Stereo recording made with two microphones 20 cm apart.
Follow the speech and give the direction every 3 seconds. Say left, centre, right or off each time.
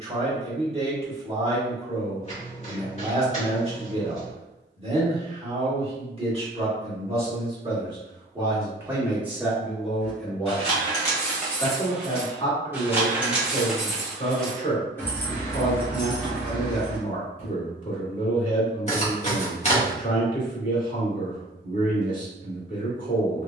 right, right, right, centre, left, left, left, left.